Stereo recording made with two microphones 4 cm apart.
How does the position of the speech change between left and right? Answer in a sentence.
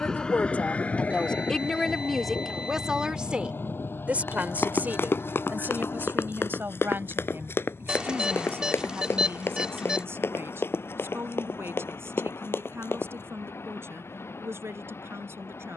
You can hear the speech move to the right.